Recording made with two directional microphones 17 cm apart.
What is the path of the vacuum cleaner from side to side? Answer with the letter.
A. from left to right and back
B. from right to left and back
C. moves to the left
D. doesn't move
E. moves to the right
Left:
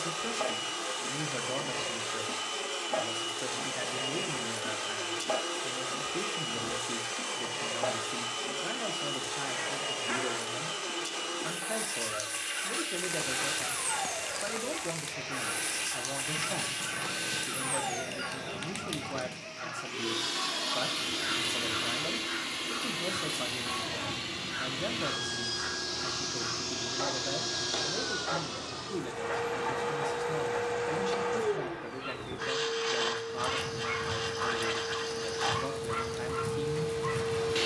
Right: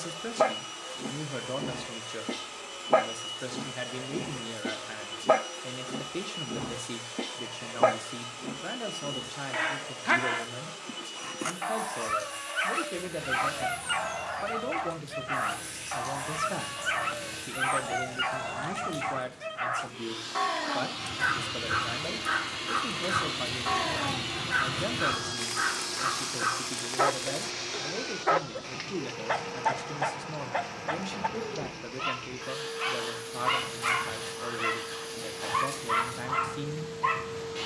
A.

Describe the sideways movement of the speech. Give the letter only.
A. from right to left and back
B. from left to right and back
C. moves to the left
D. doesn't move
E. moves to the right
D.